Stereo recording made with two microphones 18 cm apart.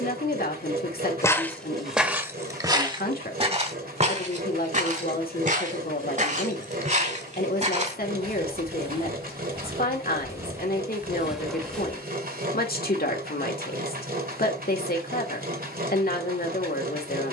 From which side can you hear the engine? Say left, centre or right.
right.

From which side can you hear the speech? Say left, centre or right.
left.